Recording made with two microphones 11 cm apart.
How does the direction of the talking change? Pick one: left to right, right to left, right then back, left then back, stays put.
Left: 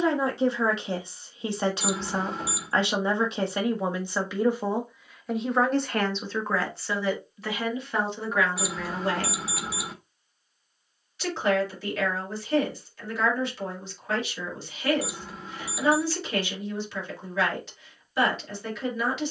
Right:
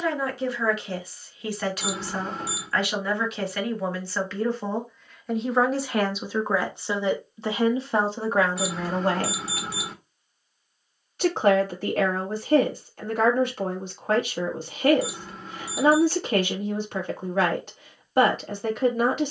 left to right.